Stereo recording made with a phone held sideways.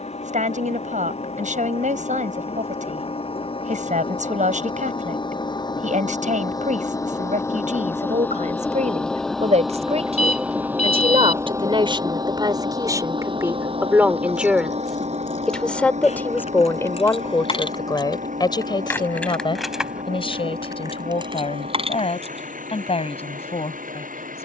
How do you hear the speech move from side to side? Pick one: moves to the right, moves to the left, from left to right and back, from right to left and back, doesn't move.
moves to the left.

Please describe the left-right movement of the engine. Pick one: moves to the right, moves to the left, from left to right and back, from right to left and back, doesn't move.
moves to the right.